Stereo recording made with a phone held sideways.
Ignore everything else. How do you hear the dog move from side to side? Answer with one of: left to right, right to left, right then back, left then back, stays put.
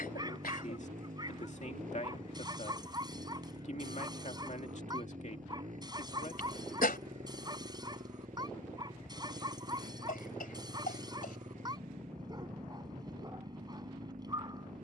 stays put.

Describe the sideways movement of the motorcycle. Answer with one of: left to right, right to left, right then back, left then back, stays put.
stays put.